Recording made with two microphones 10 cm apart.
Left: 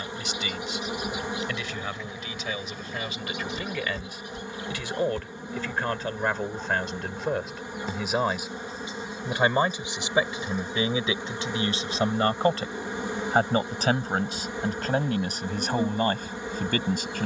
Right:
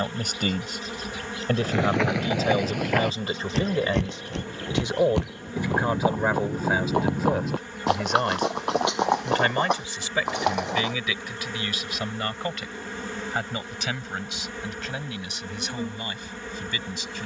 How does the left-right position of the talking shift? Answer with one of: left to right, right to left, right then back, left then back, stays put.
right to left.